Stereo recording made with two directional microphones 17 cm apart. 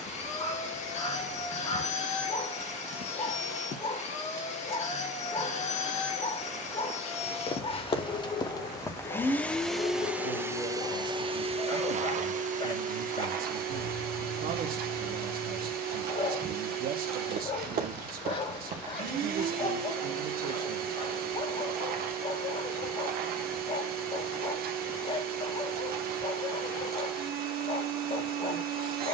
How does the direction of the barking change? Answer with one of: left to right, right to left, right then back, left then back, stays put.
stays put.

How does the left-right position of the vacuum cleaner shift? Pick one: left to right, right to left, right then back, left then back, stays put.
left to right.